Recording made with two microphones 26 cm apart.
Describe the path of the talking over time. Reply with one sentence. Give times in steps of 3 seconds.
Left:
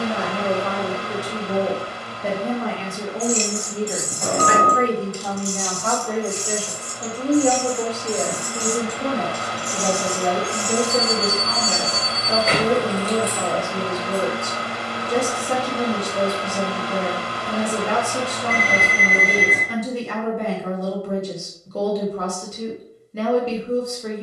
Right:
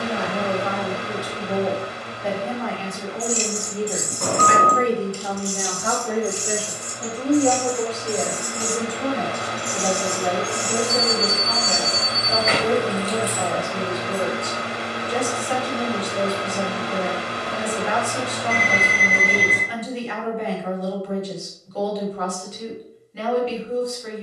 In this clip you hear the talking on the left from 0 s, in the centre from 3 s and on the left from 9 s.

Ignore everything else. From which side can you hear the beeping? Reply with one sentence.
In this clip you hear the beeping on the right.